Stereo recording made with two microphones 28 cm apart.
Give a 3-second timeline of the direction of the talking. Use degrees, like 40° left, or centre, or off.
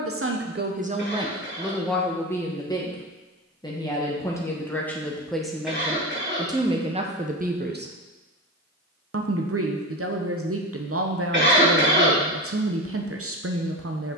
10° right, 10° left, 20° right, 50° right, 50° right.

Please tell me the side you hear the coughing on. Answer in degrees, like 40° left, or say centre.
40° right.